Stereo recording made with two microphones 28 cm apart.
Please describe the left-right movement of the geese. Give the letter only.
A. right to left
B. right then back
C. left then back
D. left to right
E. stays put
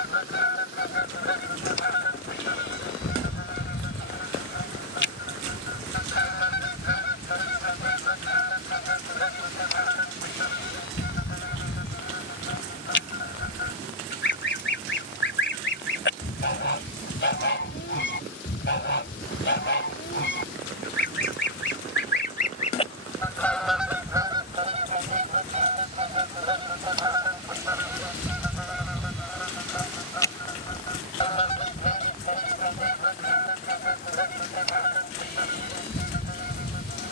B.